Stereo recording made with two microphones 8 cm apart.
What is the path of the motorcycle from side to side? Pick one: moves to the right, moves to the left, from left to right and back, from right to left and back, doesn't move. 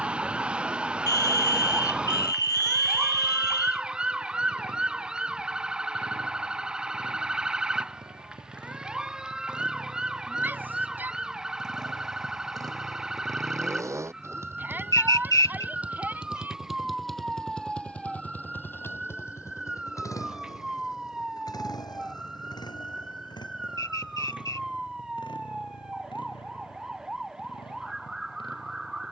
moves to the left.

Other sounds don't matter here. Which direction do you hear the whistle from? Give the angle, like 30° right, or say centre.
50° left.